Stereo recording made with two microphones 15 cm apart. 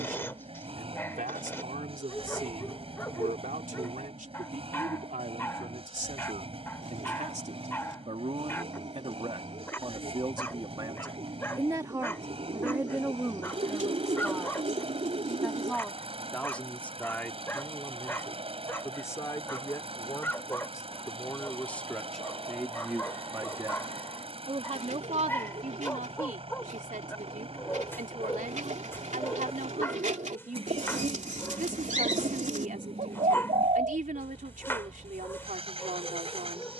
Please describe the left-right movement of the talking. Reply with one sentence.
You can hear the talking go left and come back.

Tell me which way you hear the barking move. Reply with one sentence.
You can hear the barking stay put.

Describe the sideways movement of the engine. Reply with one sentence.
You can hear the engine stay put.